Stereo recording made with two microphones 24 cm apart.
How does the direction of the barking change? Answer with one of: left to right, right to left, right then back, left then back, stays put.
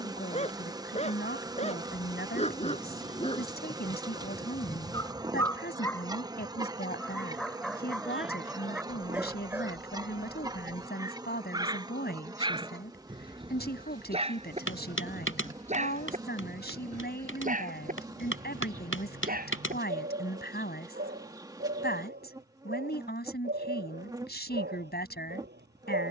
left to right.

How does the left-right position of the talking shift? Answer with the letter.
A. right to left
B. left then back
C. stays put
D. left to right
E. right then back
C.